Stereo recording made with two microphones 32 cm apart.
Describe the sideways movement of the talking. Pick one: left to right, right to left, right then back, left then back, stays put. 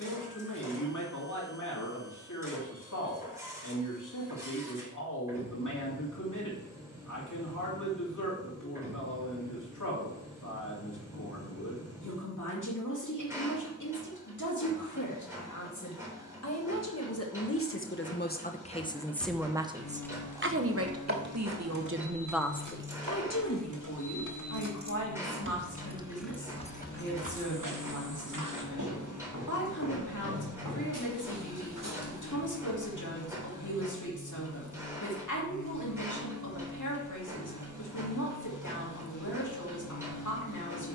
right then back.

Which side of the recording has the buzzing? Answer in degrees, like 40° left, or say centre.
60° left.